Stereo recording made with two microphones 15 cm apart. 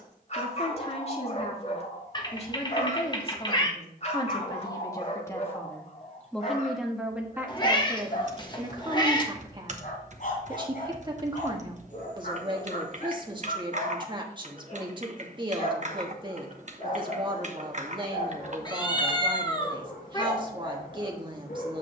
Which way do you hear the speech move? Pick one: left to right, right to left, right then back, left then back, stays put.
left to right.